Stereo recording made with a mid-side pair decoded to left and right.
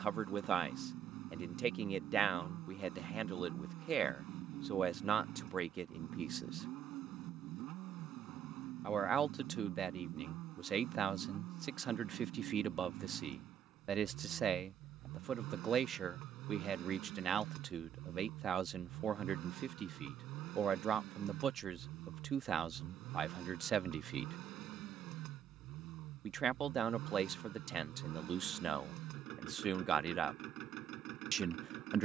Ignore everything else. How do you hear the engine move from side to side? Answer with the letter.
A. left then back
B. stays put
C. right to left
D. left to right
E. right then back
B.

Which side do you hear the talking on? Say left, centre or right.
right.